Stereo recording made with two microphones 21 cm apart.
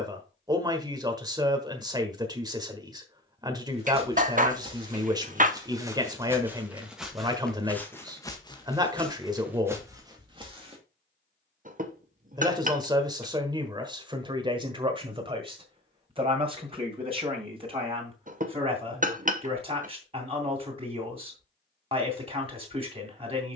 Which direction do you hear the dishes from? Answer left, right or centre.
right.